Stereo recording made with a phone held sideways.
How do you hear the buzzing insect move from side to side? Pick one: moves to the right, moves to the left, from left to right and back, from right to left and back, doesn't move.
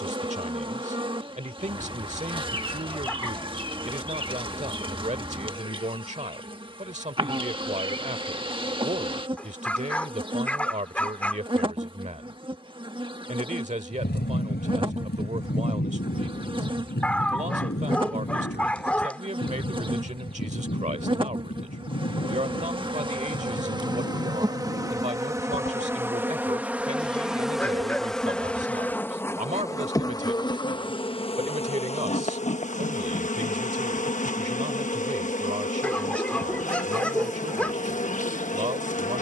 moves to the left.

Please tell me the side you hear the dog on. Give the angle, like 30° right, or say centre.
10° left.